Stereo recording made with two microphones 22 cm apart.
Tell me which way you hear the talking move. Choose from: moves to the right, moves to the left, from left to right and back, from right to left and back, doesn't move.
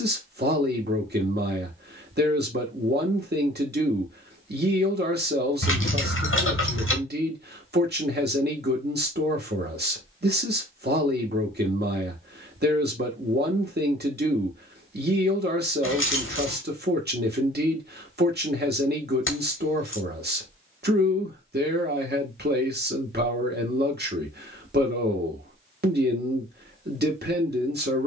doesn't move.